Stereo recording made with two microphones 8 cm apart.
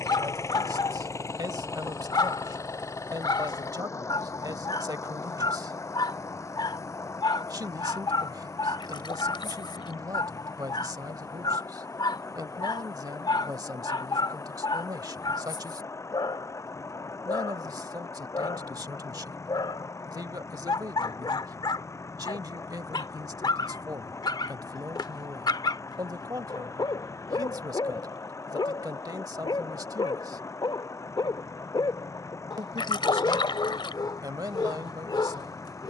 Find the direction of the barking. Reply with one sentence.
You can hear the barking on the left.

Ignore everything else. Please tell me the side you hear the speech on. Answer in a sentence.
In this clip you hear the speech on the right.